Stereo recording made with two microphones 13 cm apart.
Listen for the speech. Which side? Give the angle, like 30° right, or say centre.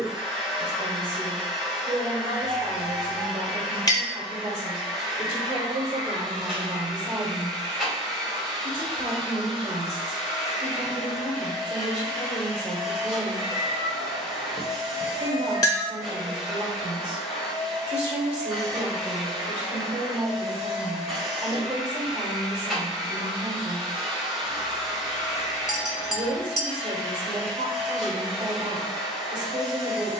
50° right.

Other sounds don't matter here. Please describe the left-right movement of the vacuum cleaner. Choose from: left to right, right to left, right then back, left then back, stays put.
stays put.